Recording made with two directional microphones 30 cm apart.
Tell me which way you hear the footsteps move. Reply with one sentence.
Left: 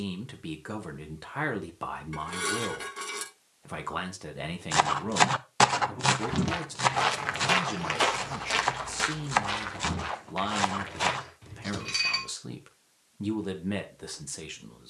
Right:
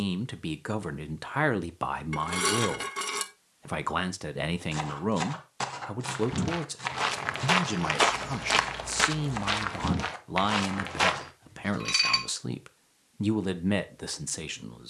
You can hear the footsteps move to the right.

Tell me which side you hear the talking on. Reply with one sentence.
In this clip you hear the talking on the right.